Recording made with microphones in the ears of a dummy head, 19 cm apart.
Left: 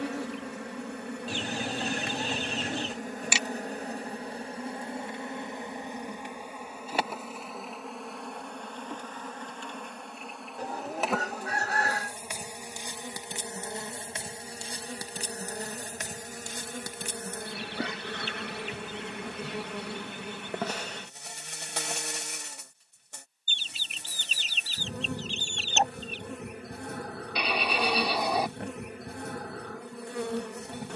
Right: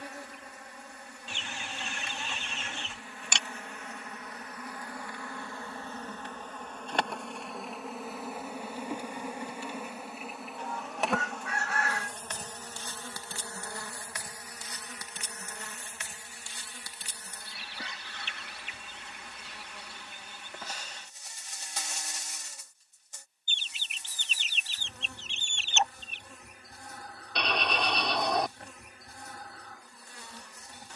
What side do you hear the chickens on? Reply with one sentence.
In this clip you hear the chickens on the left.